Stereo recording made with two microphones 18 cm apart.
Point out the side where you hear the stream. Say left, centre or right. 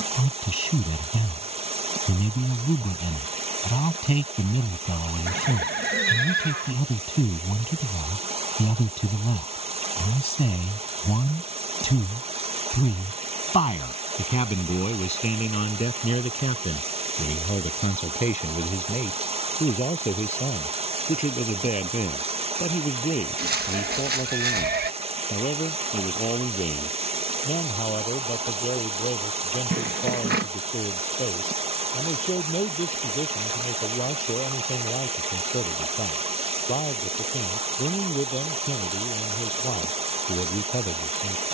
right.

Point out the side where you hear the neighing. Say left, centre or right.
right.